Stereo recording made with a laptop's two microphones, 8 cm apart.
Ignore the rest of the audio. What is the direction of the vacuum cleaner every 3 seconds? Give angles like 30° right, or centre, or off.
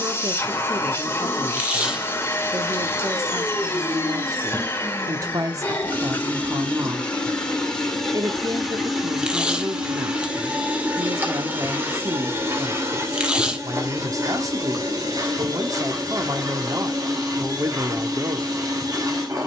30° left, 30° left, 10° left, 10° right, 40° right, 50° right, 50° right.